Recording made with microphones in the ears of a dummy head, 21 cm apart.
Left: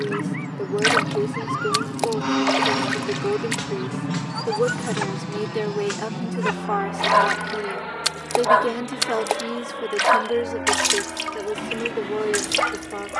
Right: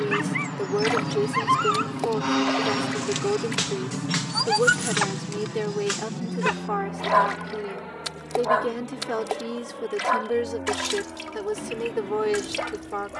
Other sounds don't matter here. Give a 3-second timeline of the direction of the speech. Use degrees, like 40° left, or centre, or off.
30° right, centre, 20° left, 10° right, 30° right.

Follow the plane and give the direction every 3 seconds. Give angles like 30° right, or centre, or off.
20° right, 20° left, 40° left, 50° left, 60° left.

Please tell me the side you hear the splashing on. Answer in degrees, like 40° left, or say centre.
40° left.